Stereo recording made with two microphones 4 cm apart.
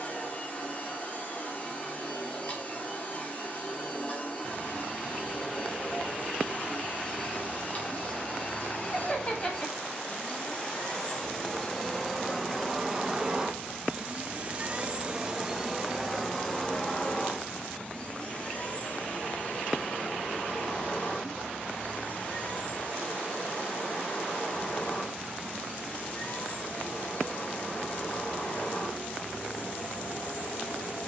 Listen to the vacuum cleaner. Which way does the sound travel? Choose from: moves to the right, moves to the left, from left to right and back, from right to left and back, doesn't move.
from left to right and back.